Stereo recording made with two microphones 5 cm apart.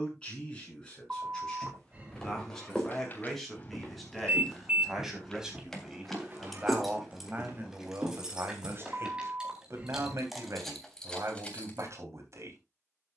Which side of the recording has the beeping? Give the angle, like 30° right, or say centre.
30° right.